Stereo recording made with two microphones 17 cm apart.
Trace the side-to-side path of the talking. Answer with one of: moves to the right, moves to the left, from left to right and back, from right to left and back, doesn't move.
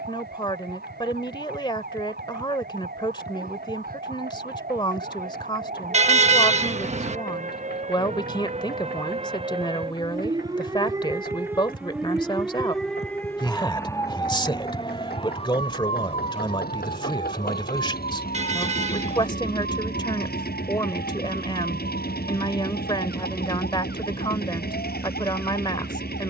doesn't move.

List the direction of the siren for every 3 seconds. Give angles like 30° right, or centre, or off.
70° right, 60° right, 50° right, 20° right, 10° left, 40° left, 60° left, 70° left, 70° left.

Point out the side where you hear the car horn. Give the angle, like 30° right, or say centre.
40° right.